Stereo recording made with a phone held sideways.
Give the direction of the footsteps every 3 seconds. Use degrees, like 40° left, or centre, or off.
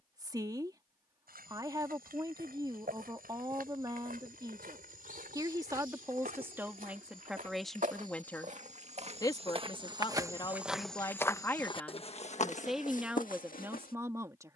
70° right, 70° right, 60° right, 10° right, 60° left.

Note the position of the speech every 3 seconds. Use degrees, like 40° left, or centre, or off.
20° right, 20° right, centre, 20° left, 10° right.